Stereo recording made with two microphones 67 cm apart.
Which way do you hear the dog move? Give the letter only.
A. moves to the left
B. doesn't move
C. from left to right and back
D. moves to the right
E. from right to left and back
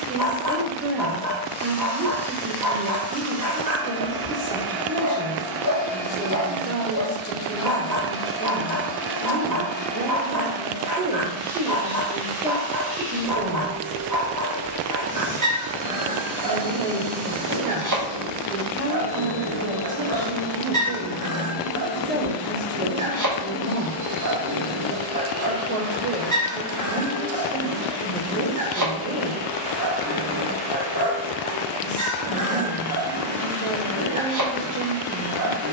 B.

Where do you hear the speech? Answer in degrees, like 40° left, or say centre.
20° right.